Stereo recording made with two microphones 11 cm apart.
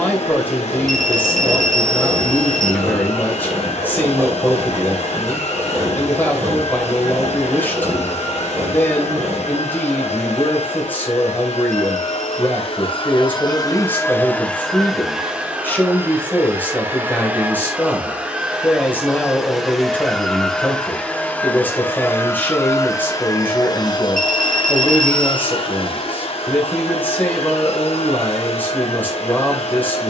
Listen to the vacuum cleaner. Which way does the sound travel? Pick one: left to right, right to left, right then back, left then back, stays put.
right then back.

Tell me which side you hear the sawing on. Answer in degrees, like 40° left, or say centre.
30° right.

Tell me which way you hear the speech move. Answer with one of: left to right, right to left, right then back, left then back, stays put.
stays put.